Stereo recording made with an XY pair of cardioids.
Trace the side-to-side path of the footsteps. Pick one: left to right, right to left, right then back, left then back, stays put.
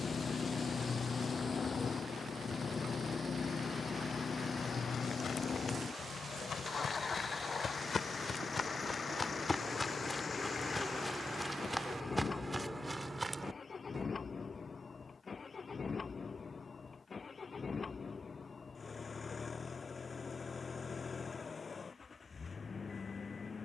left to right.